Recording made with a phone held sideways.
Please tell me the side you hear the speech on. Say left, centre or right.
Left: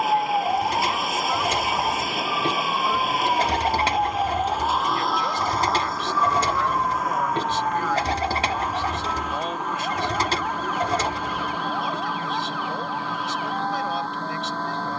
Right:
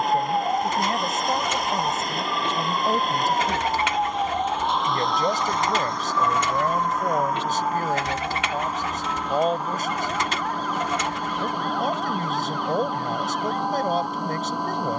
right.